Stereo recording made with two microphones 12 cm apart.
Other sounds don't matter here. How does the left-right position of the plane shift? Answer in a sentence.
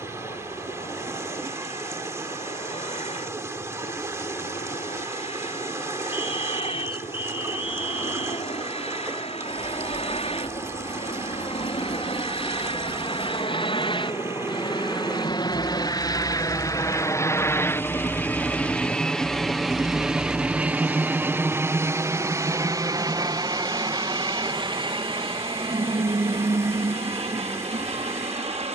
You can hear the plane move to the right.